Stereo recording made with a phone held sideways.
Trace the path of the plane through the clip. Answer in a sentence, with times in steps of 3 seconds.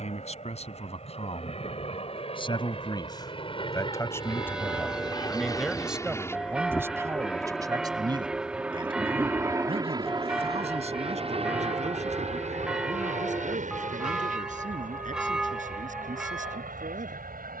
In this clip you hear the plane on the left from 0 s, in the centre from 6 s and on the right from 9 s.